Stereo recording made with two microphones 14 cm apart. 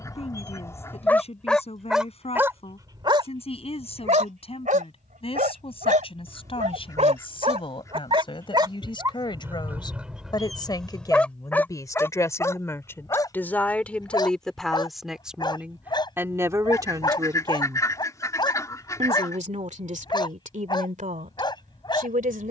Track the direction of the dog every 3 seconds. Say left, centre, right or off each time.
centre, right, right, centre, left, left, left, left.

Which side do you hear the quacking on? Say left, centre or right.
left.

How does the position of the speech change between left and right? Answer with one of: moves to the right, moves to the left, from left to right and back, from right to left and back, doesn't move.
moves to the right.